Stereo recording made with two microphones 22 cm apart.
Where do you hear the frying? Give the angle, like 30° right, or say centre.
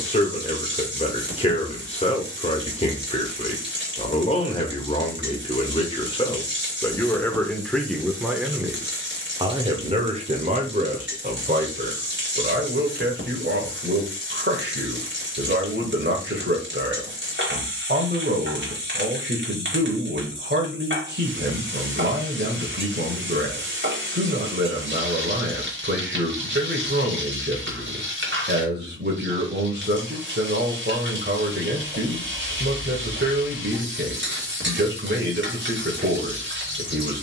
60° right.